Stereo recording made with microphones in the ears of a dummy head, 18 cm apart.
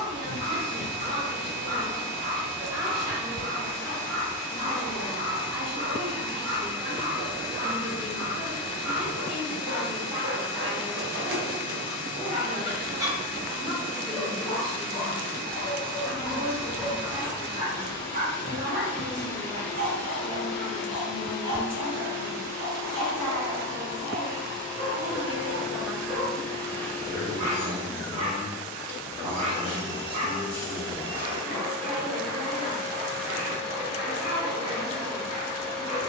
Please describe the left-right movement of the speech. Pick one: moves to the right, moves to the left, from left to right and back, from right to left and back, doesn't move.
doesn't move.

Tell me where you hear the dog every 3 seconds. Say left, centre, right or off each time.
right, right, right, right, centre, centre, right, right, right, right, right, right.